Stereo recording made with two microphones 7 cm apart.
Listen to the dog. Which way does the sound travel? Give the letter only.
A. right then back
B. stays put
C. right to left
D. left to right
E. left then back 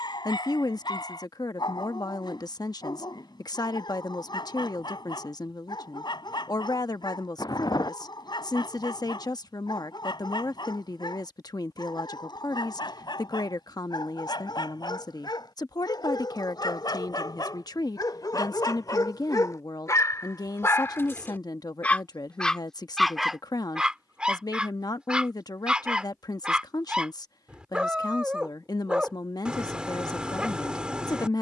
D.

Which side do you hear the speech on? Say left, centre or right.
left.